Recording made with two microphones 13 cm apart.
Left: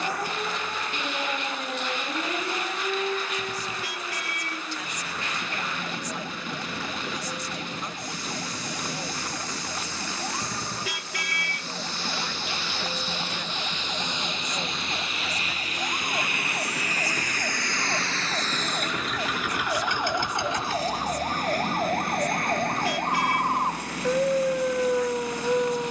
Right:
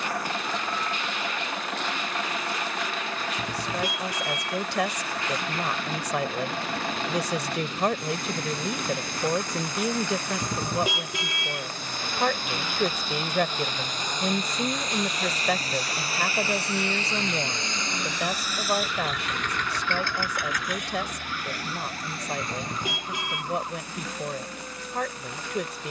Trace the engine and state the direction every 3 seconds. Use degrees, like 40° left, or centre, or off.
60° right, 60° right, 60° right, 50° right, 50° right, 30° right, 10° left, 60° left, 80° left.